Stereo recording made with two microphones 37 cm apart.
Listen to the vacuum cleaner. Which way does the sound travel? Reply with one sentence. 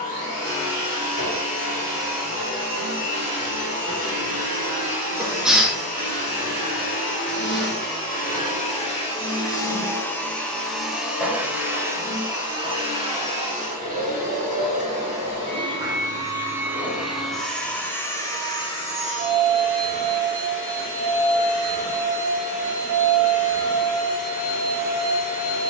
You can hear the vacuum cleaner move from left to right and back again.